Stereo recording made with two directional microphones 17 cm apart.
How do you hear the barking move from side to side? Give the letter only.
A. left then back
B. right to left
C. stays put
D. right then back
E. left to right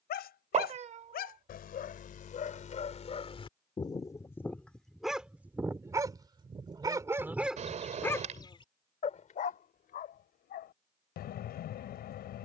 D.